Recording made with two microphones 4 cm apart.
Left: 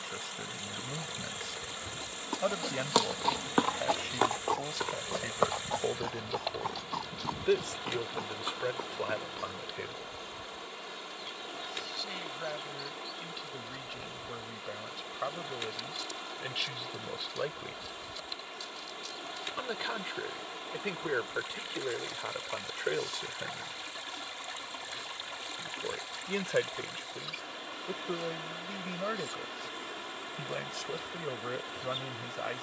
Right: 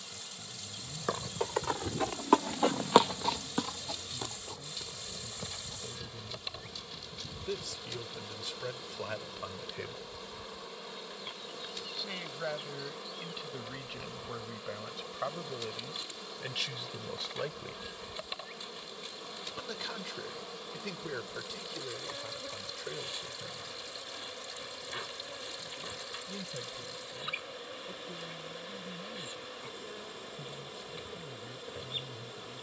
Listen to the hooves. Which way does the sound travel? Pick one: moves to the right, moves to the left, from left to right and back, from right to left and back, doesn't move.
moves to the left.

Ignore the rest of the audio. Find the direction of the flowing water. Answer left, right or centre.
left.